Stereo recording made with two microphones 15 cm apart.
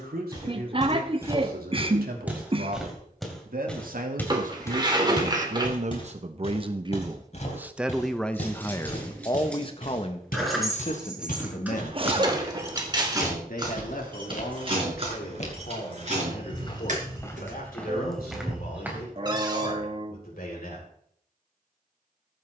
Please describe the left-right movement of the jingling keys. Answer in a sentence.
You can hear the jingling keys move to the right.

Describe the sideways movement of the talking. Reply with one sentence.
You can hear the talking move to the left.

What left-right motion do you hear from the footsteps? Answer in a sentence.
In this clip you hear the footsteps move from right to left and back again.